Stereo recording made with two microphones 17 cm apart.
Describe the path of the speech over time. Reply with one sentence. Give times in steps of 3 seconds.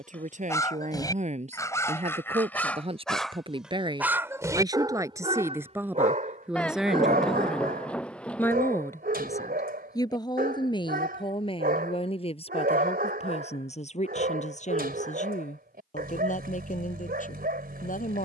You can hear the speech on the right from 0 s, in the centre from 6 s and on the left from 9 s.